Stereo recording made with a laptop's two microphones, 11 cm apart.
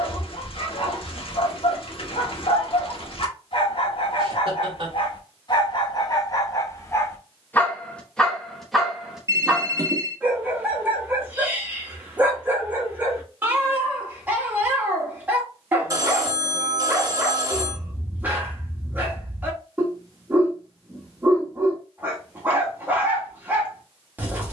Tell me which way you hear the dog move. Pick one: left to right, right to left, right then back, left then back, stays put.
left to right.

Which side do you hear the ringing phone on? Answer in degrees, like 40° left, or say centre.
30° right.